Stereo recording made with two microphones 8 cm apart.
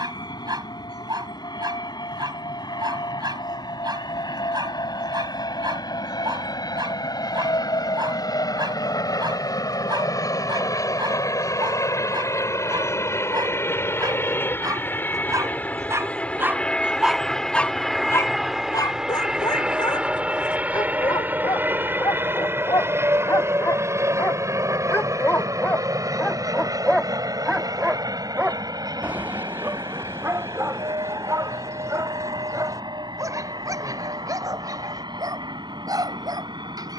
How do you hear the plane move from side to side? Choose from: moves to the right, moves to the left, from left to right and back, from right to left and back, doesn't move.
moves to the right.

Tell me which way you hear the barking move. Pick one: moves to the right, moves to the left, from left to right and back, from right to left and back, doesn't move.
from right to left and back.